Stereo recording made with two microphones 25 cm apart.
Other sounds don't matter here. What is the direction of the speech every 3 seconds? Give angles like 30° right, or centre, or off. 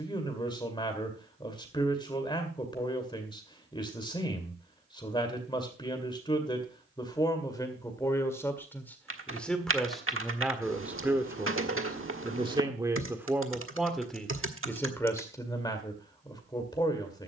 20° left, 20° left, 10° left, centre, 10° right, 20° left.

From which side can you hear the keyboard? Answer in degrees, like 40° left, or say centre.
60° right.